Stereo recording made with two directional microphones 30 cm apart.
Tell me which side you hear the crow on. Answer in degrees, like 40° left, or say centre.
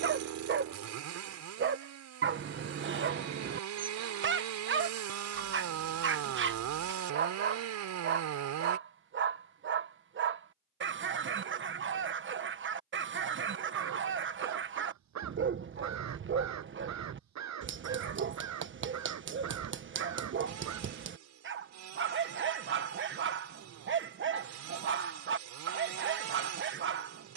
60° right.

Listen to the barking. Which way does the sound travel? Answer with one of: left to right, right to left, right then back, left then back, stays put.
stays put.